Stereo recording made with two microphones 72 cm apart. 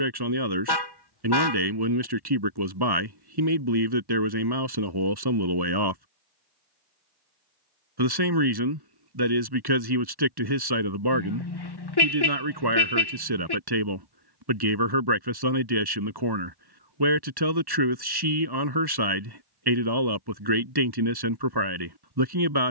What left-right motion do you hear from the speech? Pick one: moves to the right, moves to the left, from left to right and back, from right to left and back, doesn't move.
doesn't move.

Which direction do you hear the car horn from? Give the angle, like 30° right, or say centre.
30° left.